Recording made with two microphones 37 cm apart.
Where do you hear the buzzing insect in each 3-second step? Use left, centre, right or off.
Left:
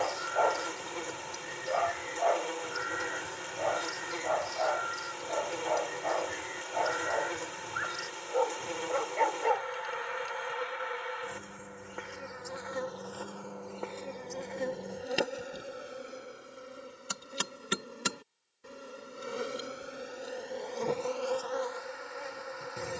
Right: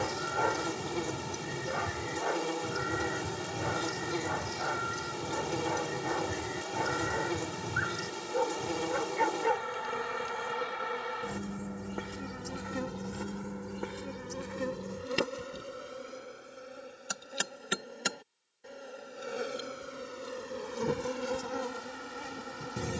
right, right, right, right, right, centre, centre, right.